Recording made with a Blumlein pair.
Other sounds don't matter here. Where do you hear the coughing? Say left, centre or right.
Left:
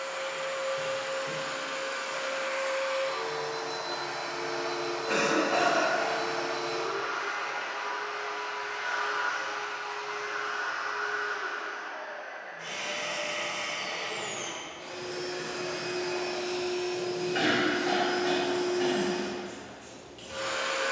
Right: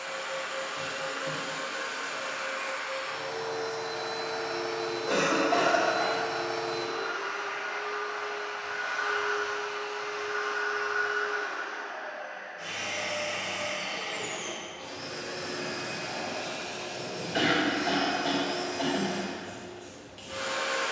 right.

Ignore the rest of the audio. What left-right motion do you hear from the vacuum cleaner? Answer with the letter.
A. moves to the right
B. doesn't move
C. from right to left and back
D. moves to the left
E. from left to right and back
C.